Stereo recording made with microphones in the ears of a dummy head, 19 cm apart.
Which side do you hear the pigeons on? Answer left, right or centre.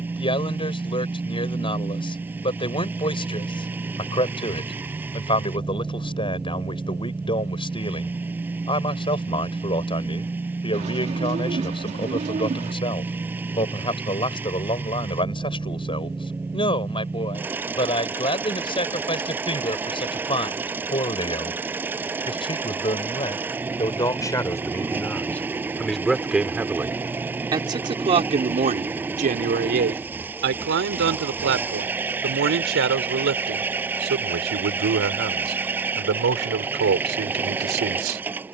right.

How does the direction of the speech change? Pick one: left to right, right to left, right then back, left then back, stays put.
left to right.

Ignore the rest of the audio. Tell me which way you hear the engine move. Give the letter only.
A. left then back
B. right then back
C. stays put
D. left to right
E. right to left
C.